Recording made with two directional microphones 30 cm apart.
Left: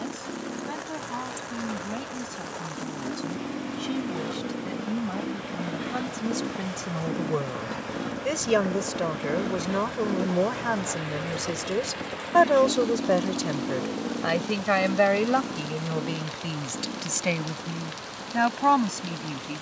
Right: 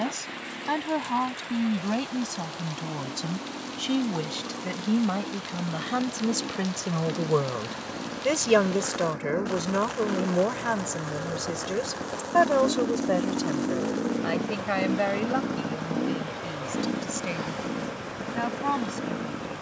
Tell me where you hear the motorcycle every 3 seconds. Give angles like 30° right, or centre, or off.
50° left, 40° left, 30° left, 10° left, 20° right, 50° right, 60° right.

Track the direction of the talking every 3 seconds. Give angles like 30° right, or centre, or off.
60° right, 50° right, 30° right, centre, 30° left, 40° left, 50° left.